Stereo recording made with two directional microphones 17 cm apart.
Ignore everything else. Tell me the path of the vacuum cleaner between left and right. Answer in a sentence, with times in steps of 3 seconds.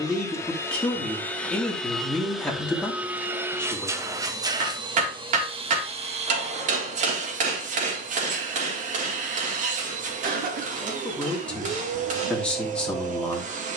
You can hear the vacuum cleaner in the centre from 0 s and on the right from 3 s.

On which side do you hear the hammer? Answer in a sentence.
In this clip you hear the hammer on the right.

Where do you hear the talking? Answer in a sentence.
In this clip you hear the talking in the centre.